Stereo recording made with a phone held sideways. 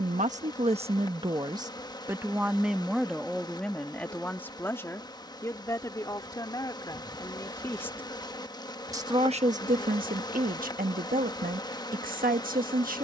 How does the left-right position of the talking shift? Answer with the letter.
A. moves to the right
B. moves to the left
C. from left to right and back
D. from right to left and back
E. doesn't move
D.